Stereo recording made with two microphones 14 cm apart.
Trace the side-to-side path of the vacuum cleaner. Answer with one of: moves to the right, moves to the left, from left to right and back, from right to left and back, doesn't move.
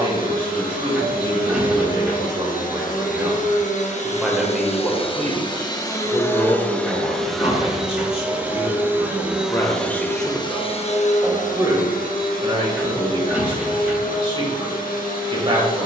from left to right and back.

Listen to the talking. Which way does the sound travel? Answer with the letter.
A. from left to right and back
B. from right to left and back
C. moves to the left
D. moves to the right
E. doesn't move
B.